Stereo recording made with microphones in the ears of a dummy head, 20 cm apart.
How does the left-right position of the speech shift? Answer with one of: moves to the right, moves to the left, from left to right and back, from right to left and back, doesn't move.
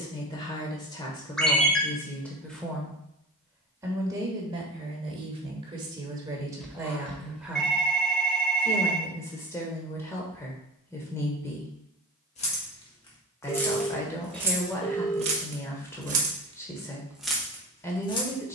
from left to right and back.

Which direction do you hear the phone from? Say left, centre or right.
centre.